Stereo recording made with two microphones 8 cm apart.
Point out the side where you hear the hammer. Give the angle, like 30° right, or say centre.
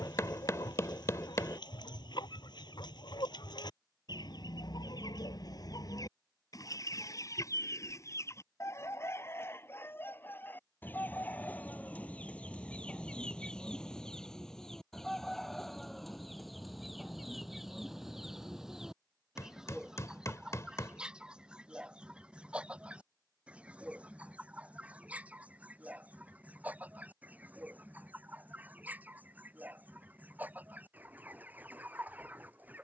40° left.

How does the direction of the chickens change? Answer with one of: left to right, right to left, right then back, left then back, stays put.
left to right.